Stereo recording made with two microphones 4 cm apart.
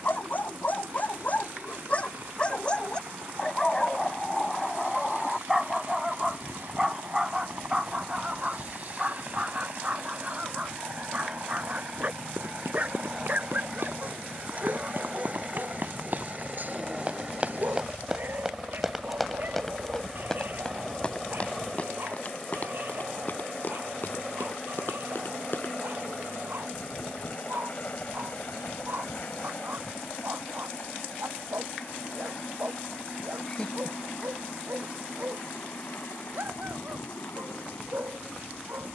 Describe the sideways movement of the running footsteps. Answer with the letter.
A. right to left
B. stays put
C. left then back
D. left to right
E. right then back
A.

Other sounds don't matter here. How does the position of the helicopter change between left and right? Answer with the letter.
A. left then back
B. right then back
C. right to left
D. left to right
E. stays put
C.